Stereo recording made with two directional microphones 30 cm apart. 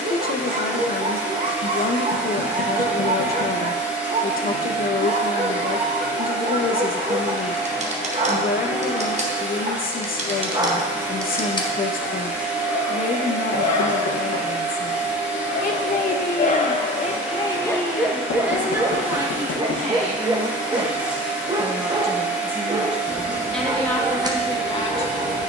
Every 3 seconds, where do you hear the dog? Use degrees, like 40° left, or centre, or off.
20° right, 20° right, 20° right, 10° right, 50° left, 30° left, 10° right, 10° right, 10° right.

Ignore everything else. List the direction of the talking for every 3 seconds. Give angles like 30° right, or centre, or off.
30° left, 30° left, 30° left, 30° left, 30° left, 20° left, 10° right, centre, 10° left.